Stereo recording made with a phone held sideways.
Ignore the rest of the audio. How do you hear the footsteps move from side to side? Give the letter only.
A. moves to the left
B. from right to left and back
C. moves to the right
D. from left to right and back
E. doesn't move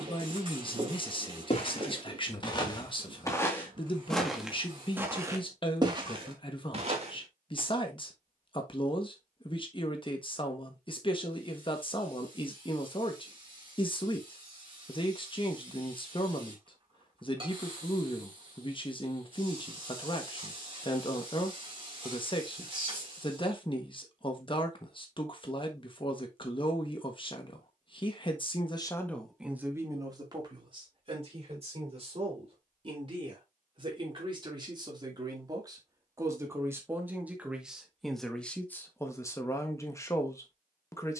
C.